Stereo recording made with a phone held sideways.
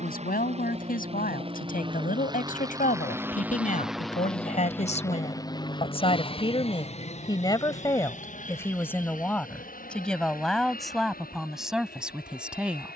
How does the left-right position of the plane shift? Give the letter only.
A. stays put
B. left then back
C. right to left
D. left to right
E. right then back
C.